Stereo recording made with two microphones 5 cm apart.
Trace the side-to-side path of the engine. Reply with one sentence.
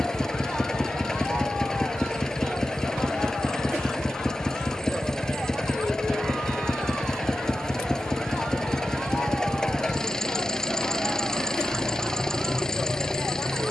In this clip you hear the engine stay put.